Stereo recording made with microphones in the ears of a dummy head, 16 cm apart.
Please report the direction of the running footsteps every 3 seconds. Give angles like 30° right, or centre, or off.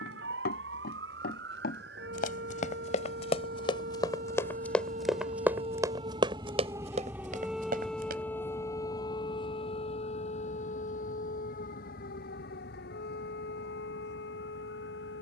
50° left, 10° left, 40° right, off, off.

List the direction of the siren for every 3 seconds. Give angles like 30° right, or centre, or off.
70° right, 50° right, centre, 40° left, 60° left.